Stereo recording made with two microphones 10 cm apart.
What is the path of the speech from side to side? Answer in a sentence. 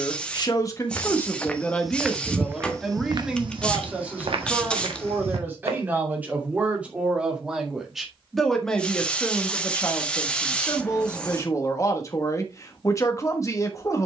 You can hear the speech go right and come back.